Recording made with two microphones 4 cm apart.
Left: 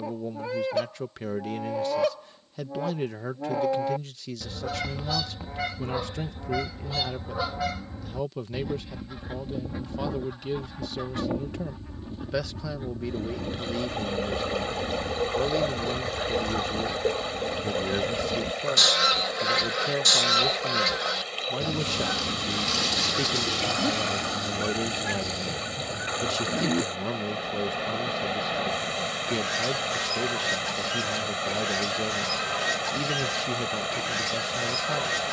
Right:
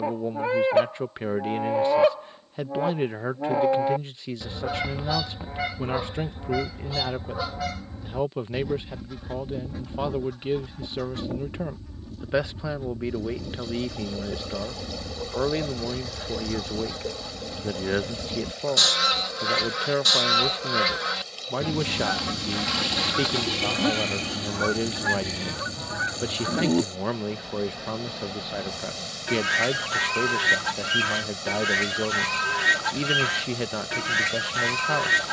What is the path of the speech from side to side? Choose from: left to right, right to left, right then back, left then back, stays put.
stays put.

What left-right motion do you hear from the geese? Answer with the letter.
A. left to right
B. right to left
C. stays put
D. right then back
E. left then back
E.